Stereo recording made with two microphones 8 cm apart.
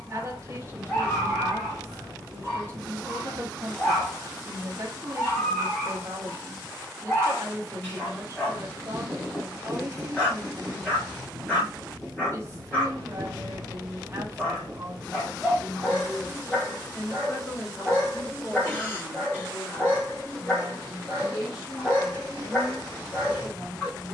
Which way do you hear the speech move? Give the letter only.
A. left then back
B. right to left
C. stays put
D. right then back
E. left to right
B.